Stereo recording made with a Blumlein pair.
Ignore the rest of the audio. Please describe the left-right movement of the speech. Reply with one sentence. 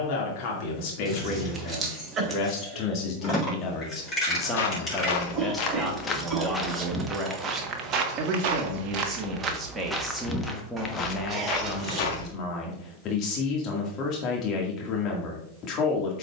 In this clip you hear the speech move from left to right and back again.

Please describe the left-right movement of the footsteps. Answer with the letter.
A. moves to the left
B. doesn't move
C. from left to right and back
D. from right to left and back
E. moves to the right
C.